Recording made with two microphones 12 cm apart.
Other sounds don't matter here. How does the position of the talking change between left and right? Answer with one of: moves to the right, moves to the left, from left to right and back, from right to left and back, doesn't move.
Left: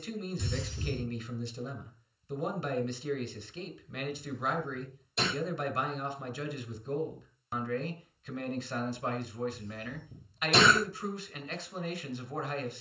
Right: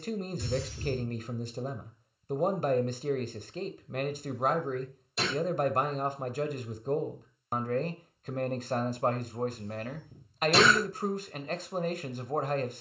doesn't move.